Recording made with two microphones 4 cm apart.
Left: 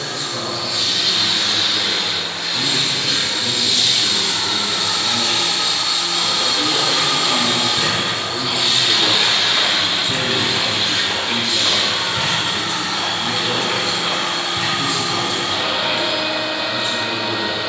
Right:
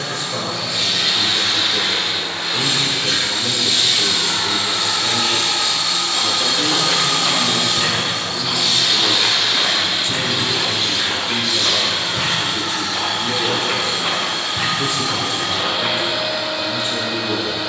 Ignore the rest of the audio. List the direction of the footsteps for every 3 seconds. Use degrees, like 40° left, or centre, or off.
off, off, 20° right, 10° left, 20° right, 40° right.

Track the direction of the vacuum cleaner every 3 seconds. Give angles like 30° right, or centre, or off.
40° right, 20° right, 20° left, 60° left, 60° left, 60° left.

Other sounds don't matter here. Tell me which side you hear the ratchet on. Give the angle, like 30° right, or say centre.
20° left.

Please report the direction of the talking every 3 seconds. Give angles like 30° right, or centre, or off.
60° right, 60° right, 30° left, 10° left, 40° right, 60° right.